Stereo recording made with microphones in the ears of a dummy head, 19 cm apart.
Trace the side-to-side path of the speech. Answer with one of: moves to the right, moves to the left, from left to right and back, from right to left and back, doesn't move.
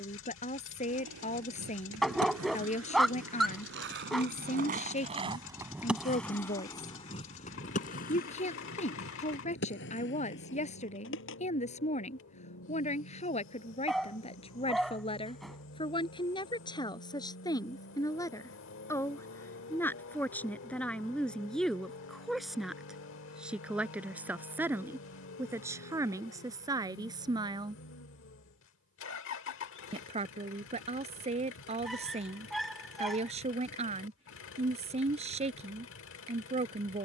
moves to the right.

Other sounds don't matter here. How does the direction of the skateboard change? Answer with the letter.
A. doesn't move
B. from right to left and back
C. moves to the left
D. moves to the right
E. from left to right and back
C.